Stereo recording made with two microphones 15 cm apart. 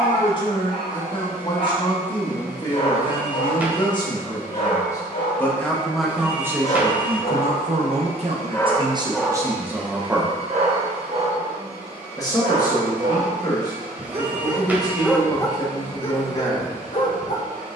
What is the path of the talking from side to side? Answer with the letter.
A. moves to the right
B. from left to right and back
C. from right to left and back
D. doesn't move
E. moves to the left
B.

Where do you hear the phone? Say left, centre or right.
centre.